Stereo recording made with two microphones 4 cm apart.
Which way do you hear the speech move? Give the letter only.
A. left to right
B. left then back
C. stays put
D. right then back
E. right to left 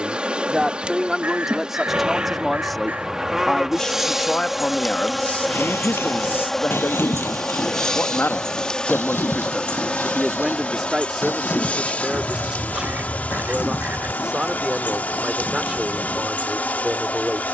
B.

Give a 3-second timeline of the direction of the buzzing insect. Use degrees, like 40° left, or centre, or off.
20° right, 10° right, 10° left, 30° left, 40° left, 40° left.